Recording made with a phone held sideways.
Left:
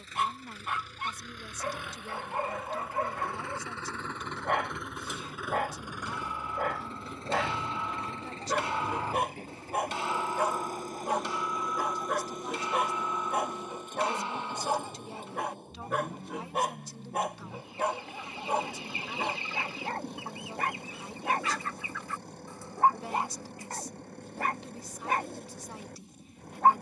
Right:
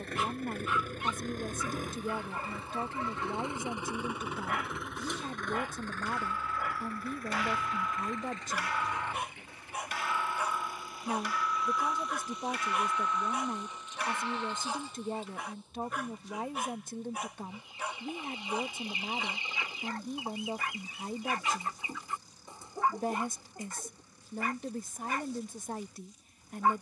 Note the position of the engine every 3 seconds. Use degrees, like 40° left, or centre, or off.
40° right, 10° right, 30° left, 40° left, 50° left, 60° left, 60° left, 60° left, 60° left.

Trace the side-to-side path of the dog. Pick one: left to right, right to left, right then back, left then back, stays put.
stays put.